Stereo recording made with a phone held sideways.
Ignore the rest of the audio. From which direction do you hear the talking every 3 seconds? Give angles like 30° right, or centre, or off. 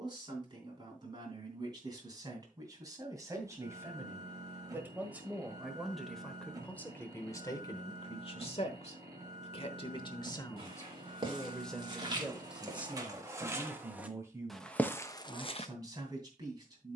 30° right, 20° right, 30° left, 20° left, 10° right, 30° right.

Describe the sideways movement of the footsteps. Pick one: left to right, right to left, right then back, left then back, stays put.
right to left.